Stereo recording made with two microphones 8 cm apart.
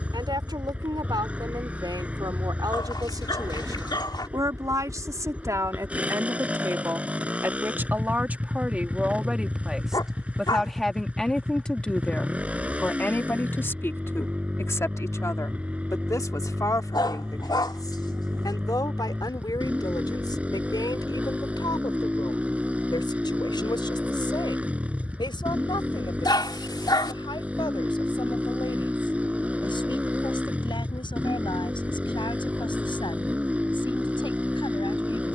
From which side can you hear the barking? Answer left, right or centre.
left.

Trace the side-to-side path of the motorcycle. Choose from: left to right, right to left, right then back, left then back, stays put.
stays put.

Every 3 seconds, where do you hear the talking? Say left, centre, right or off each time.
right, right, right, centre, left, left, left, left, left, left, left, left.